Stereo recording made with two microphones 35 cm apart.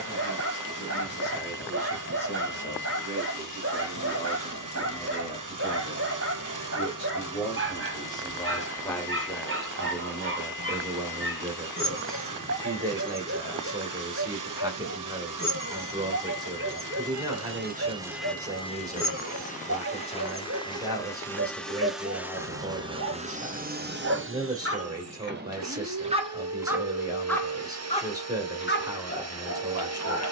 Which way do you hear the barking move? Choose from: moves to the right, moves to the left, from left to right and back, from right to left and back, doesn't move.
moves to the left.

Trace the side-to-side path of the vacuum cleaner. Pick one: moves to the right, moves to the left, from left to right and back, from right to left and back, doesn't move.
from right to left and back.